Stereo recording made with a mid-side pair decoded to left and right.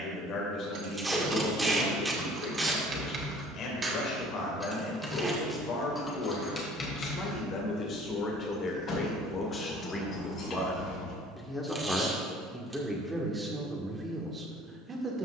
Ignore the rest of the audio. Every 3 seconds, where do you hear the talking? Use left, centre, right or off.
left, left, left, left, centre.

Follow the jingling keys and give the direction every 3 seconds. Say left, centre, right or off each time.
right, centre, left, left, off.